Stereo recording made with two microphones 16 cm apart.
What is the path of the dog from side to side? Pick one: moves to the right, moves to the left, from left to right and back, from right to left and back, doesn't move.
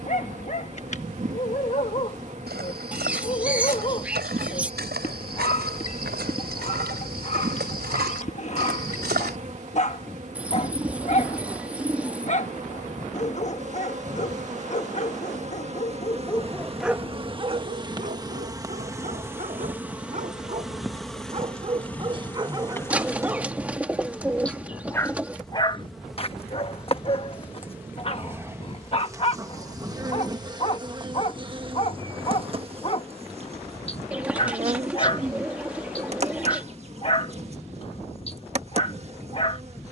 from left to right and back.